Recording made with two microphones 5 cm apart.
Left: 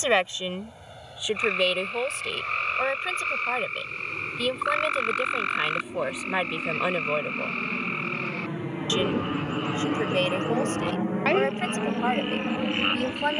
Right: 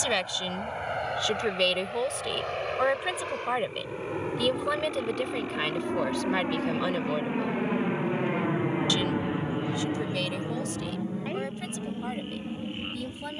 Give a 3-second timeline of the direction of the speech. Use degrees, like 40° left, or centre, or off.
10° left, centre, 20° left, 40° left, 50° left.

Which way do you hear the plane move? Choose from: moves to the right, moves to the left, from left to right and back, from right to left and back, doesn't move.
moves to the left.